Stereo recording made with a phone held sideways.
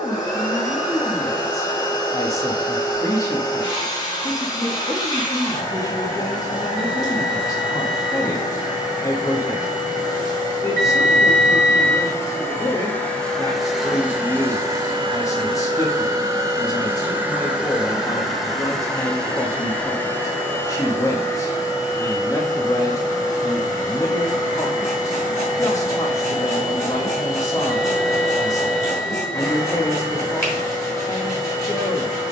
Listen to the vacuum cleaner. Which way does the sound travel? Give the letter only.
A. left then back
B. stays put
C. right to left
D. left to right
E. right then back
E.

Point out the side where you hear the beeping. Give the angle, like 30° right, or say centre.
20° left.